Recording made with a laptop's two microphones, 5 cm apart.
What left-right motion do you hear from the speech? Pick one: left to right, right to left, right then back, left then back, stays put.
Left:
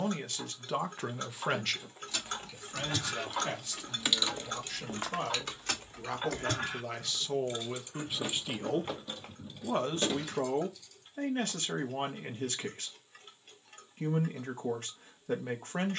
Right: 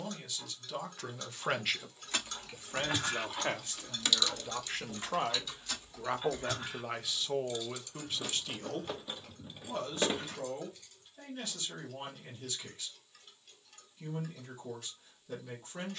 right then back.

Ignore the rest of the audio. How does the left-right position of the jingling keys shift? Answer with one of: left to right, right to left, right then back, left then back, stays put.
left then back.